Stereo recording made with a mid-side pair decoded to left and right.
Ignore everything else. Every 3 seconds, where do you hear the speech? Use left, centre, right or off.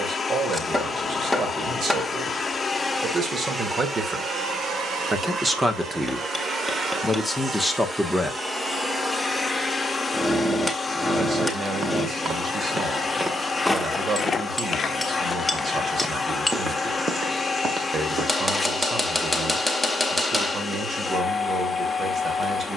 right, right, centre, right, right, right, right, right.